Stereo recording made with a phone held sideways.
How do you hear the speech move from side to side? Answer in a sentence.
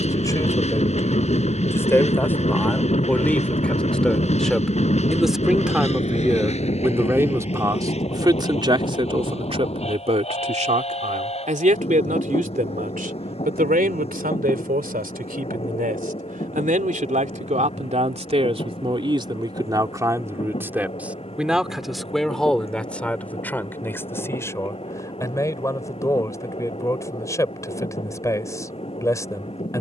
In this clip you hear the speech move from left to right and back again.